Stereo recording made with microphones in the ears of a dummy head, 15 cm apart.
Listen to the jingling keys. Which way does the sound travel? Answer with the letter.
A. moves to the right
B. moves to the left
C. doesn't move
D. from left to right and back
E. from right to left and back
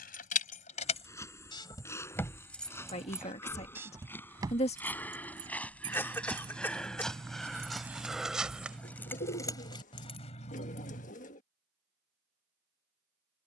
D.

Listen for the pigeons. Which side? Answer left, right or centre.
left.